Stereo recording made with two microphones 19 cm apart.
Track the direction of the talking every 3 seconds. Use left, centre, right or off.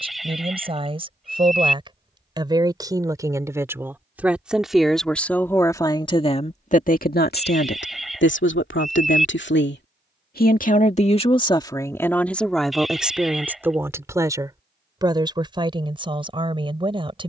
right, centre, left, left, centre, right.